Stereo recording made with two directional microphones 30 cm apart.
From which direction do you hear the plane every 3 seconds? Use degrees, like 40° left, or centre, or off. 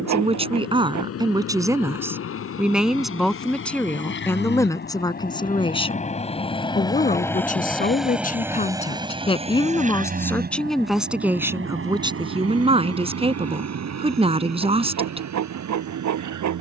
60° left, 40° left, 10° left, 30° right, 50° right, 60° right.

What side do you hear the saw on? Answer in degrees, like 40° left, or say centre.
70° right.